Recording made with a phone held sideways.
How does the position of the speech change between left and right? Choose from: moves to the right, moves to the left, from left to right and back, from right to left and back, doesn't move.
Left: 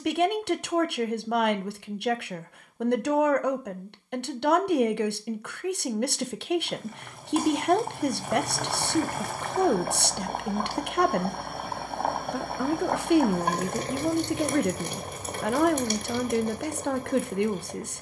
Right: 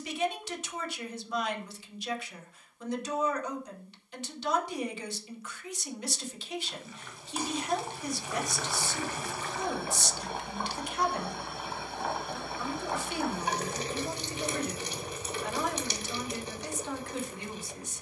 doesn't move.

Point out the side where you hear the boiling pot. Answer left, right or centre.
left.